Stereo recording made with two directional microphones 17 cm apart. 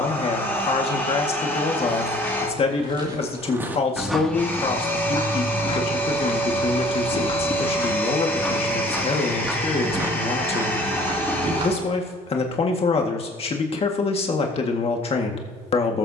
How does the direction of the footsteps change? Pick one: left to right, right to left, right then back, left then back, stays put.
left then back.